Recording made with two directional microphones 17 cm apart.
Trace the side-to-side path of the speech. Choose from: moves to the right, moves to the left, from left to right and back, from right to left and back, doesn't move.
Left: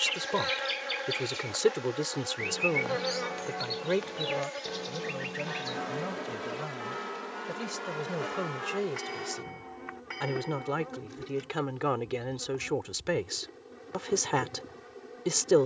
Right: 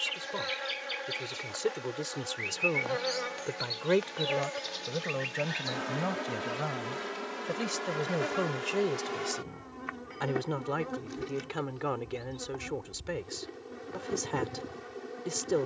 from left to right and back.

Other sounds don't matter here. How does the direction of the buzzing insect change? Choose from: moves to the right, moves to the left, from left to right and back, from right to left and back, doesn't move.
moves to the right.